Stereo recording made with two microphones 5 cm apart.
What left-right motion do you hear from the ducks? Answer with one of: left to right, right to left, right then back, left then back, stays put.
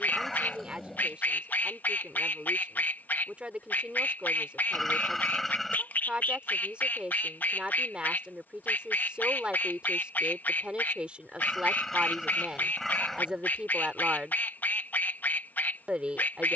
stays put.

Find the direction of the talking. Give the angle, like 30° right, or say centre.
20° right.